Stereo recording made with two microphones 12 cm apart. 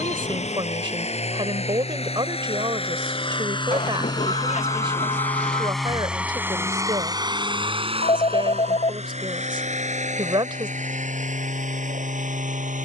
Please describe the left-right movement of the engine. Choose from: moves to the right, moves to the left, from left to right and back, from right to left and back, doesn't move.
moves to the right.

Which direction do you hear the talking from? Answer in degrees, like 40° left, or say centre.
40° right.